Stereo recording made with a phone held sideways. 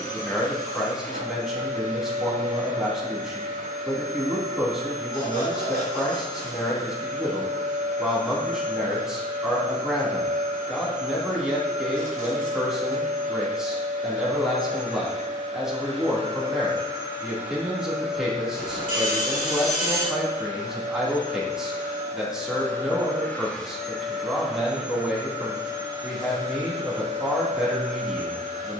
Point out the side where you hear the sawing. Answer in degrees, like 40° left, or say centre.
70° left.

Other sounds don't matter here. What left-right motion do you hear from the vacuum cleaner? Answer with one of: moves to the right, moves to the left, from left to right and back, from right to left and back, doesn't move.
from right to left and back.